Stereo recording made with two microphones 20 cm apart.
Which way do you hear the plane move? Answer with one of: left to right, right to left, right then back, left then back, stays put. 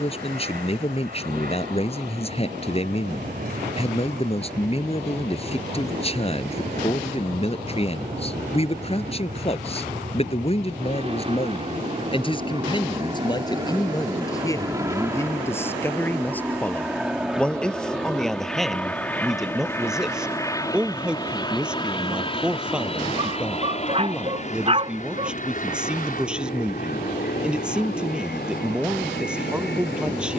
right to left.